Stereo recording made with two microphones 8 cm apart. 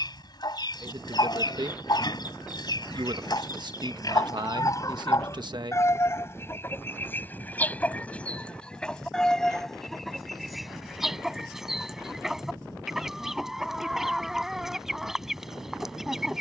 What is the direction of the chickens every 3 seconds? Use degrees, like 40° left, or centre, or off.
60° left, 50° left, 20° left, centre, centre, centre.